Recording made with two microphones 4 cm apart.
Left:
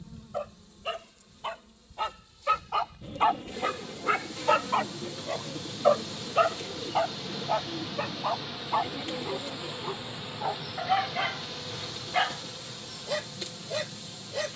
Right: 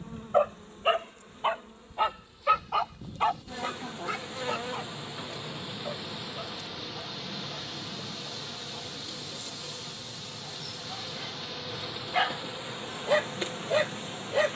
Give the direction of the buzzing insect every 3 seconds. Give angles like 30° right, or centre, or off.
40° right, 30° right, centre, 10° left, 30° right.